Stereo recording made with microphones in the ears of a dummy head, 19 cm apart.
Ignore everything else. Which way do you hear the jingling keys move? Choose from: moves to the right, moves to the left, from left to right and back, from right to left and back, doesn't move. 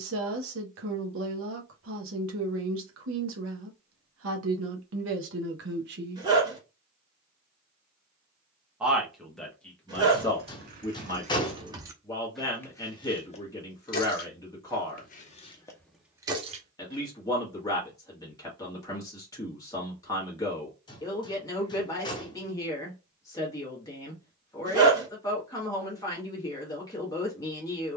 from right to left and back.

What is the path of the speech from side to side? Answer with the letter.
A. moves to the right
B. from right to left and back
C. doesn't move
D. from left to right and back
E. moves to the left
E.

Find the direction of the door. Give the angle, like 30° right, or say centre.
20° left.